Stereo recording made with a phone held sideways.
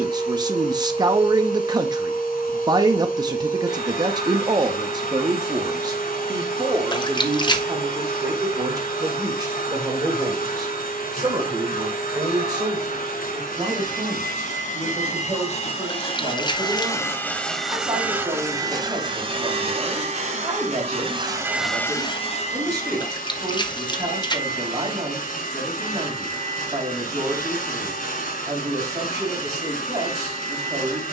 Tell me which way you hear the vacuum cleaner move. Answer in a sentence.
In this clip you hear the vacuum cleaner go right and come back.